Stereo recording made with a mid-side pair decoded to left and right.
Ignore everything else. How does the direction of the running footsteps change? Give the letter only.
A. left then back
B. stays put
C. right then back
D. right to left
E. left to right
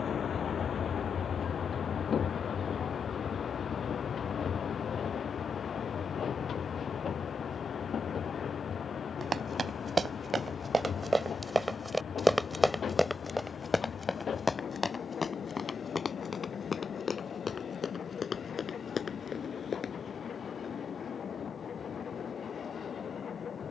D.